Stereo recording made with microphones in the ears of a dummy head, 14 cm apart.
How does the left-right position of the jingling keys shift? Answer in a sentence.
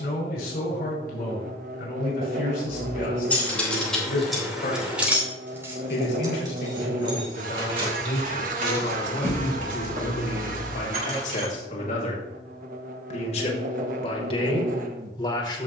In this clip you hear the jingling keys go from the left side to the right.